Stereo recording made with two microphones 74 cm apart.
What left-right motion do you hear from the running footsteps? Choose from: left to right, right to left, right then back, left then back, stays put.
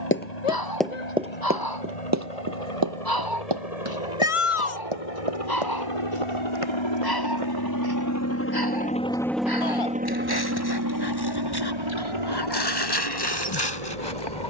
left to right.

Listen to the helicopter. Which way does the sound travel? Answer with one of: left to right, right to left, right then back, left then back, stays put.
left to right.